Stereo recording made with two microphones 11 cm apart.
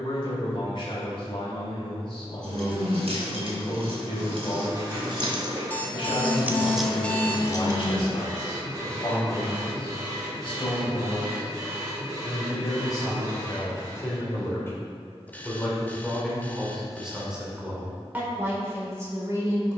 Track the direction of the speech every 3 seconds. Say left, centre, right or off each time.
left, left, left, left, left, centre, right.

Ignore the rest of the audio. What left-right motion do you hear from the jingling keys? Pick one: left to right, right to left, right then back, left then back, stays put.
right to left.